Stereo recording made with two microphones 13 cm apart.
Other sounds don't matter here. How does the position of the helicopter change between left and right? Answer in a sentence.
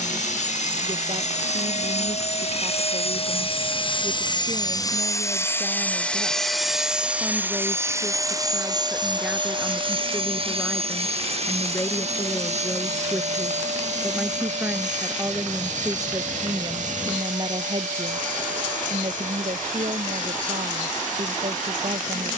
In this clip you hear the helicopter move to the right.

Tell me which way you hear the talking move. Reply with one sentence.
You can hear the talking move from right to left and back again.